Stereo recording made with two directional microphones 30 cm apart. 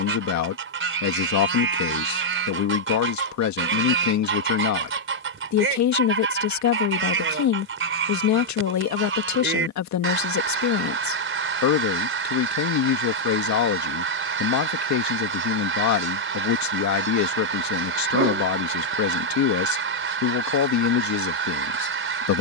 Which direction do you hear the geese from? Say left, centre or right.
right.